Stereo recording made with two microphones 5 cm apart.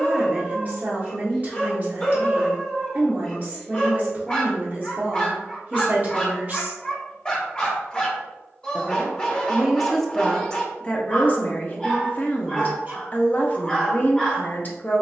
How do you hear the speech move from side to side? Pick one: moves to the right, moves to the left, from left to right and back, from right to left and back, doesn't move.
moves to the left.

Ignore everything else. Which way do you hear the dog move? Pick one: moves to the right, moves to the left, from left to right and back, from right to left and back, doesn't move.
doesn't move.